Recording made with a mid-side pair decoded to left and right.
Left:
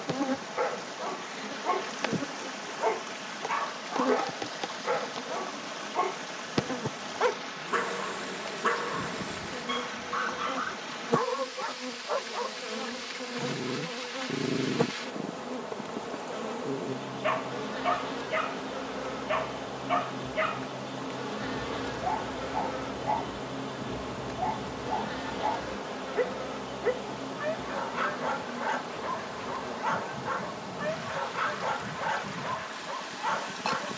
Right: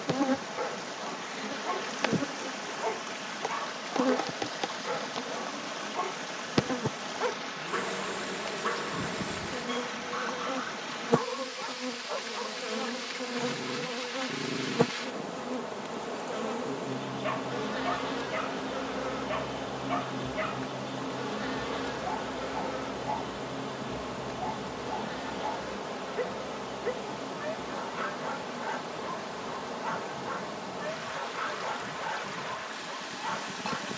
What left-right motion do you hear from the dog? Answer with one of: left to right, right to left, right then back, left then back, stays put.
stays put.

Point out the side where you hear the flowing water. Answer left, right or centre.
centre.